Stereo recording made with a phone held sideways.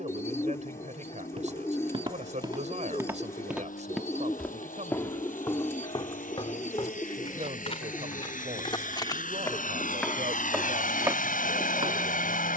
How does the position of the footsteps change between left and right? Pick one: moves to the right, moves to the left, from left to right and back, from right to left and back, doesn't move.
from right to left and back.